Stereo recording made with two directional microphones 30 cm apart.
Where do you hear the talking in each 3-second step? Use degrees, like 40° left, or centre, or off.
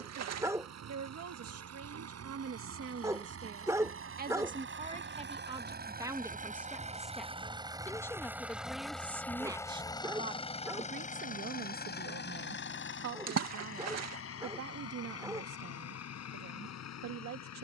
50° right, 30° right, centre, 30° right, 60° right, 60° right.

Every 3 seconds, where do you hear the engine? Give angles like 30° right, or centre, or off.
60° right, 40° right, 20° right, 20° left, 40° left, 60° left.